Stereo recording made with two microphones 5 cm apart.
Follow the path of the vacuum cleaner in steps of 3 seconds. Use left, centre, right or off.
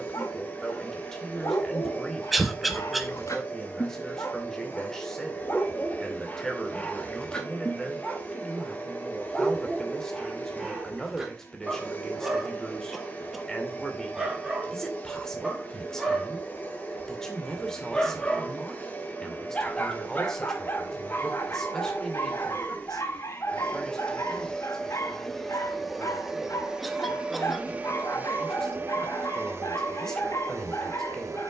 left, left, left, left, left, left, left, left, centre, right, right.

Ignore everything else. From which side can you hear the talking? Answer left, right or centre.
centre.